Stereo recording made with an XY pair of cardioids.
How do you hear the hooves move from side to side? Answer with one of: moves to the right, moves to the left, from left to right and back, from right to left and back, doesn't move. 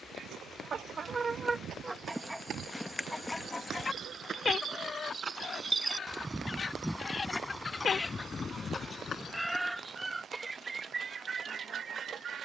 moves to the left.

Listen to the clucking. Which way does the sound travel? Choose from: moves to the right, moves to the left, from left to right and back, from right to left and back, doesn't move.
from right to left and back.